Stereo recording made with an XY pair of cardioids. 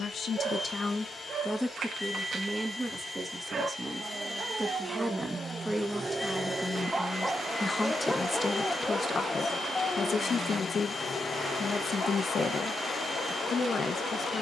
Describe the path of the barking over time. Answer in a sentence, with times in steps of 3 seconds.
You can hear the barking on the right from 0 s, in the centre from 6 s and on the left from 9 s.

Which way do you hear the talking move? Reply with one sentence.
You can hear the talking move from left to right and back again.